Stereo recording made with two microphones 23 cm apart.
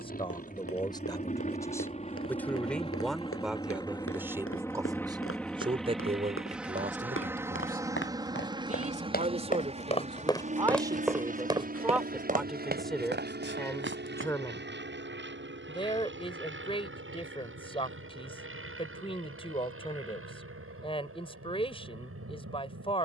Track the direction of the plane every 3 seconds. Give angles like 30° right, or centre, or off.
30° left, 10° left, 10° right, 30° right, 40° right, 50° right, 60° right, 60° right.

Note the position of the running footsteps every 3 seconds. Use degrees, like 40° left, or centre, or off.
80° left, 70° left, 60° left, 10° left, 50° right, off, off, off.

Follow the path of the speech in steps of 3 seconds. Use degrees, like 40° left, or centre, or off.
10° left, 10° right, 30° right, 20° right, centre, 20° left, 20° left, 20° left.